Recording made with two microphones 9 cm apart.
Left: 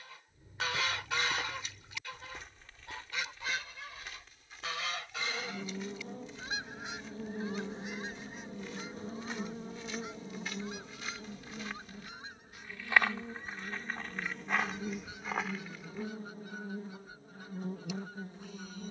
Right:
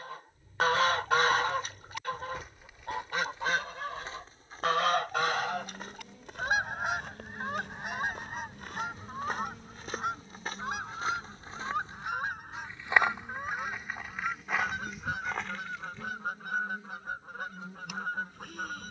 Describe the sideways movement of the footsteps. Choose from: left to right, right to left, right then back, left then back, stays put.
right then back.